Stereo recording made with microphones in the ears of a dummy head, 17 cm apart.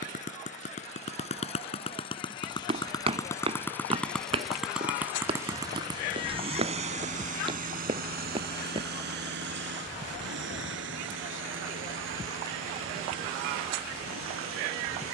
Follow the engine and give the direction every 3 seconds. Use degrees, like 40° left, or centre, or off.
30° left, centre, 40° right, 70° right, 80° right.